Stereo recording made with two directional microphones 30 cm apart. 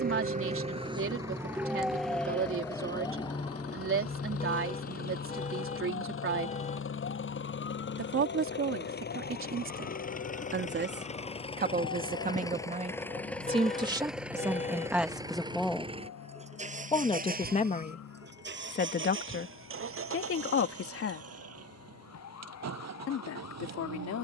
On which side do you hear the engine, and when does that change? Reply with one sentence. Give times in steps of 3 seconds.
In this clip you hear the engine on the left from 0 s, in the centre from 12 s and on the right from 15 s.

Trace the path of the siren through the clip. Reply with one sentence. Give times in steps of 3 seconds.
You can hear the siren in the centre from 0 s and on the left from 3 s.